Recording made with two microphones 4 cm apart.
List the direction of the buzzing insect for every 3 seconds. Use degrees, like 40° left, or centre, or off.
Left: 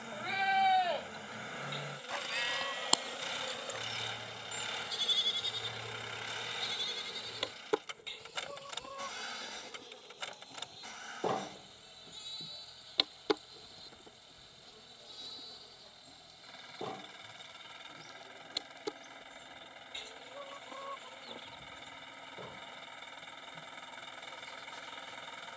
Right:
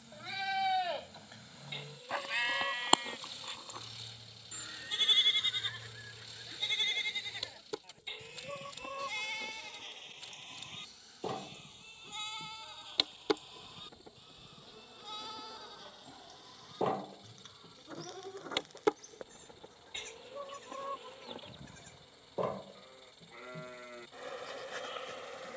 60° left, 60° left, 50° left, 30° left, centre, 30° right, 50° right, 70° right, 70° right.